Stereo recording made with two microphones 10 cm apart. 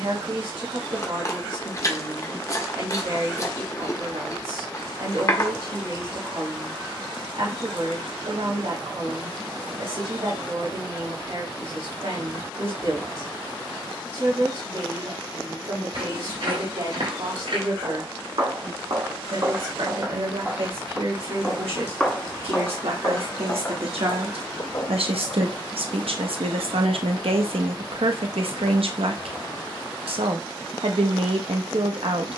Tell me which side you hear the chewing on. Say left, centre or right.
left.